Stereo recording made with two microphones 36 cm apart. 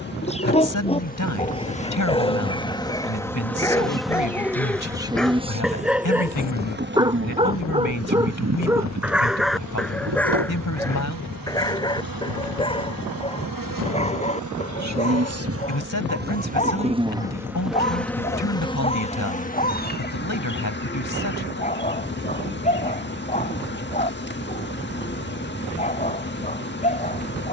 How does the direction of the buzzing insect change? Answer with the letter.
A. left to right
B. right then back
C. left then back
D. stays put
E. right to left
B.